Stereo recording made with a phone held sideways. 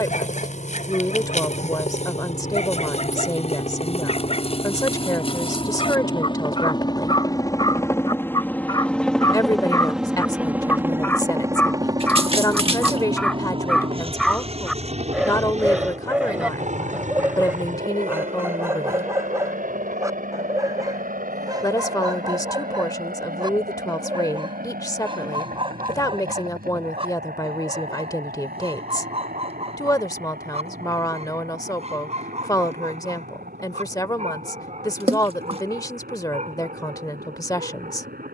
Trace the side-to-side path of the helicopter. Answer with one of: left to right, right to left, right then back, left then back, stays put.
left to right.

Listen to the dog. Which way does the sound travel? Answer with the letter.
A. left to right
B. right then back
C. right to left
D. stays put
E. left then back
A.